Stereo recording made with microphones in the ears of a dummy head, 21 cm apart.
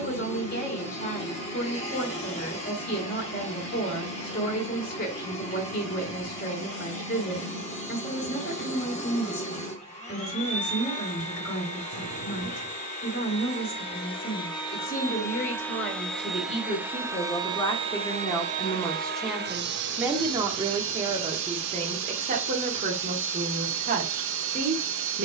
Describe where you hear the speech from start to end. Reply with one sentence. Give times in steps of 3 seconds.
In this clip you hear the speech on the left from 0 s, in the centre from 18 s and on the right from 21 s.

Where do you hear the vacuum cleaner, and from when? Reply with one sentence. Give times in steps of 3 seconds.
You can hear the vacuum cleaner on the left from 0 s, in the centre from 15 s and on the right from 18 s.